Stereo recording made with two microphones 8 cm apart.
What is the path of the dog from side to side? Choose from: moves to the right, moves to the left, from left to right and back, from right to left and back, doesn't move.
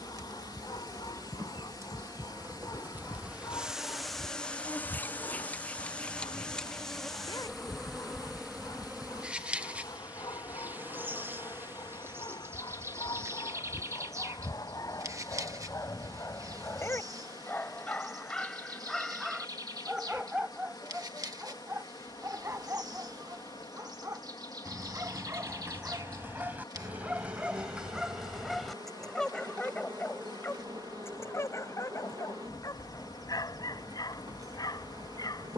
from left to right and back.